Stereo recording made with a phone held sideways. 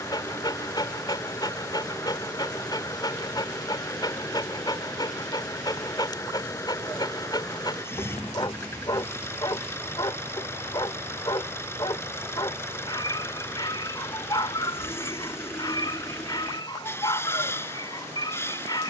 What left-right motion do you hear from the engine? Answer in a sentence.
You can hear the engine stay put.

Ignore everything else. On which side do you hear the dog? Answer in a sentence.
You can hear the dog on the left.